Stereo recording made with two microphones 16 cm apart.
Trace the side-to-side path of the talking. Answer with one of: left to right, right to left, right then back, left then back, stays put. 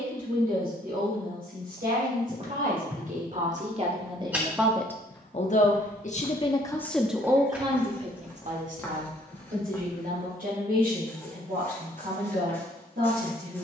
left then back.